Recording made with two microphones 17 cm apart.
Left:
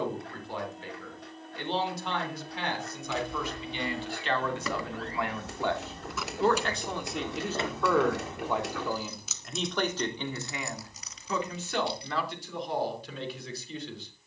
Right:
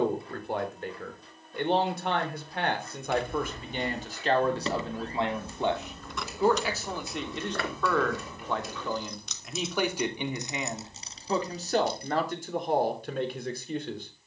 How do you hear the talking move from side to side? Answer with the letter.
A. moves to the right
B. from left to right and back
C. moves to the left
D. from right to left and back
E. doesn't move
D.